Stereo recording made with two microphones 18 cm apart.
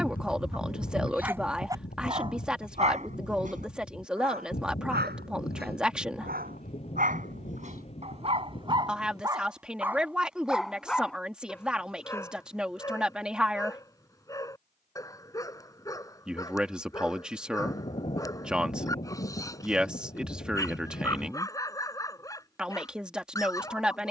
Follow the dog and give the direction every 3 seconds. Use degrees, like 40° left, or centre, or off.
10° right, 60° right, 40° right, centre, 20° left, 20° left, 20° left, 20° left.